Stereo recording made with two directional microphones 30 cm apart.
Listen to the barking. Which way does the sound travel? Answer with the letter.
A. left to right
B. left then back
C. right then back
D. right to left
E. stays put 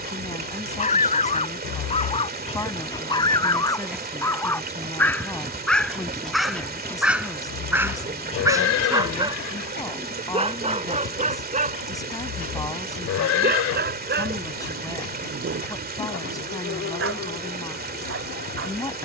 A.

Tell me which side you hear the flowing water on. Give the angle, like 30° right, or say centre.
30° right.